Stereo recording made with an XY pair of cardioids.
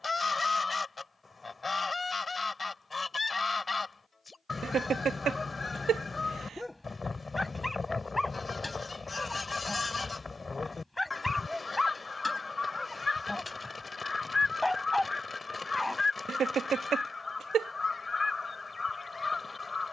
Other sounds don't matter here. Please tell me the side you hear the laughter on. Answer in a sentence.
In this clip you hear the laughter on the right.